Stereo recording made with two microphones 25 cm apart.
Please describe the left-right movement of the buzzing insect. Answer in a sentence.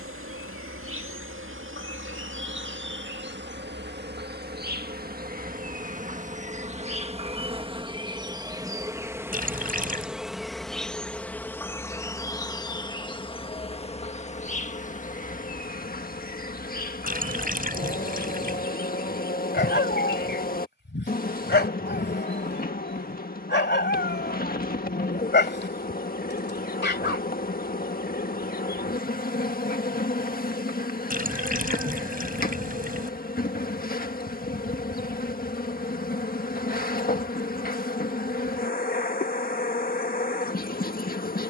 In this clip you hear the buzzing insect travel towards the left.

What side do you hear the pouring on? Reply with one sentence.
You can hear the pouring on the right.